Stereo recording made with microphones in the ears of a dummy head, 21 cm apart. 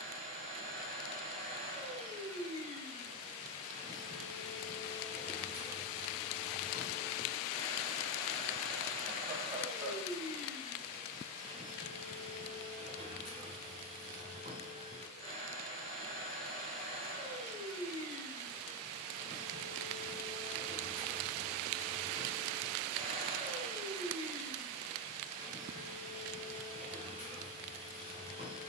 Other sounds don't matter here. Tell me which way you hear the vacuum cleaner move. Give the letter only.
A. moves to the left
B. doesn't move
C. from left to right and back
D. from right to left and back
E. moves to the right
B.